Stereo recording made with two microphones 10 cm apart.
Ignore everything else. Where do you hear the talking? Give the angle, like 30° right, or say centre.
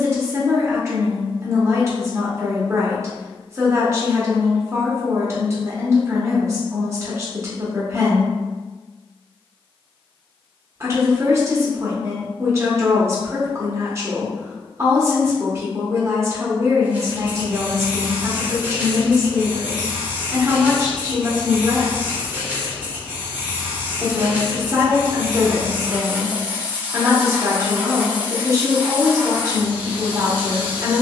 30° right.